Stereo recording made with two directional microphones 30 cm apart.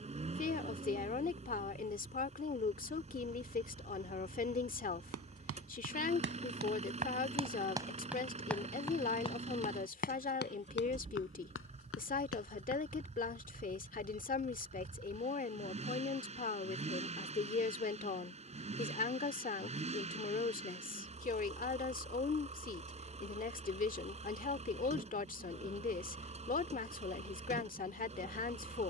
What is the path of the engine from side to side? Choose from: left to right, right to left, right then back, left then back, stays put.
stays put.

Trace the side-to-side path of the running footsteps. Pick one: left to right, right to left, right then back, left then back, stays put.
right to left.